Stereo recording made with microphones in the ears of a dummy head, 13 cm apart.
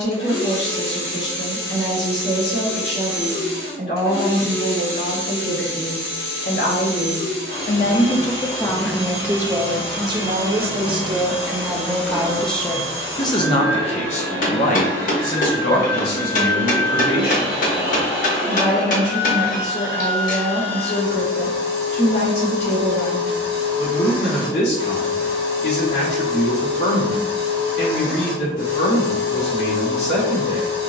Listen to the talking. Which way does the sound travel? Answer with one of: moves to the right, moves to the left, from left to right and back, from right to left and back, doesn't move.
from left to right and back.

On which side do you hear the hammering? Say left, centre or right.
left.